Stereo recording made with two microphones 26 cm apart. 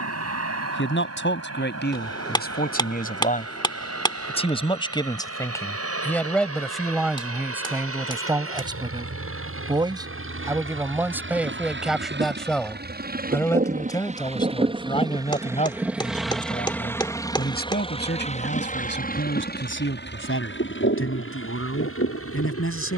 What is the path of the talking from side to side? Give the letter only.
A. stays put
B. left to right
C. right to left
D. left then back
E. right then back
E.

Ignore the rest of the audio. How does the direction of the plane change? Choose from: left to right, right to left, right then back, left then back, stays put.
right to left.